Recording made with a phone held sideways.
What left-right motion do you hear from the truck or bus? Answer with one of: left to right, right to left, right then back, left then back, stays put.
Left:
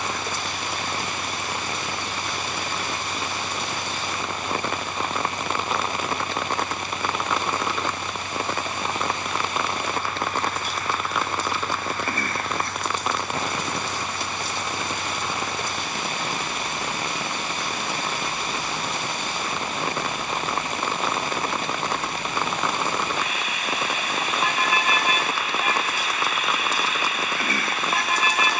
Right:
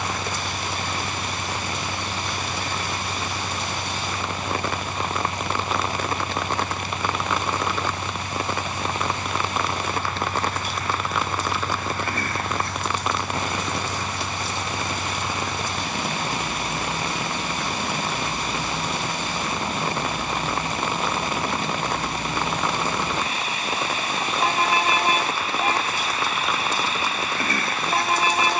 stays put.